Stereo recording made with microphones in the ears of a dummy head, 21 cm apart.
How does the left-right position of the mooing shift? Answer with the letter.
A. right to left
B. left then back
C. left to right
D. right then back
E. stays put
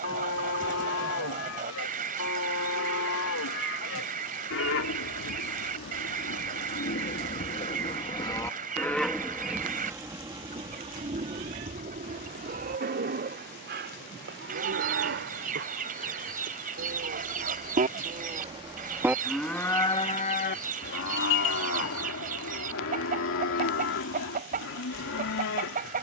D.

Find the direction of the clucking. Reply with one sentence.
In this clip you hear the clucking on the right.